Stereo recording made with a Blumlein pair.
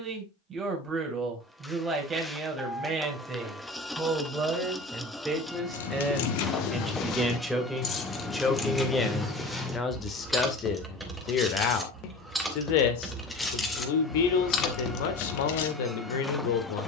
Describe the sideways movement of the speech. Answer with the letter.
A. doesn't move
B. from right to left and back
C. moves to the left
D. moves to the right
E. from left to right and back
C.